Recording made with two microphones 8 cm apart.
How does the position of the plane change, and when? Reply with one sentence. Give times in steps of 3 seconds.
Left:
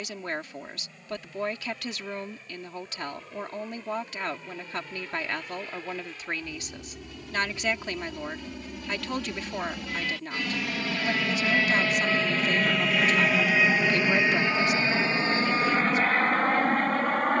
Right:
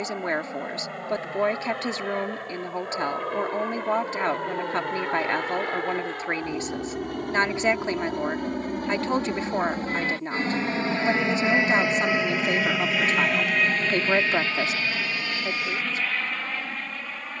You can hear the plane on the right from 0 s, in the centre from 12 s and on the left from 15 s.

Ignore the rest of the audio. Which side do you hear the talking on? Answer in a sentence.
In this clip you hear the talking on the right.